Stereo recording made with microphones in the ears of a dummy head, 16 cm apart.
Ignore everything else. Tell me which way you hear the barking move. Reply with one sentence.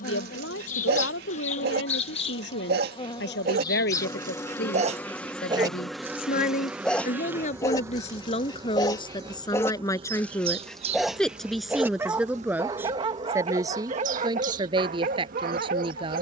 In this clip you hear the barking move from right to left and back again.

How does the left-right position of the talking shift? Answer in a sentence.
You can hear the talking move from left to right.